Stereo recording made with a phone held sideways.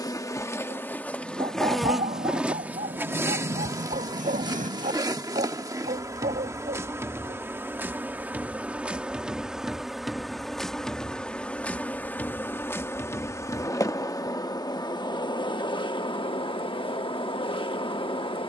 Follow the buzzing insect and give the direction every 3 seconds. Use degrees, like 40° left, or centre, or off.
10° left, 20° right, 20° right, centre, 20° left, 40° left.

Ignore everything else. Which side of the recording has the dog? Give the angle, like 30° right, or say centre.
70° right.